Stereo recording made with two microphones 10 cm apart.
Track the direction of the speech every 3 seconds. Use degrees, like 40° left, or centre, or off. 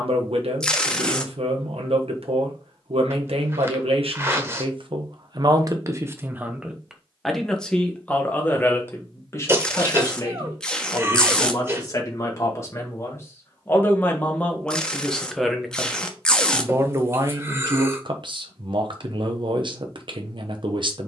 70° right, 60° right, centre, 30° left, 20° left, 20° right, 50° right.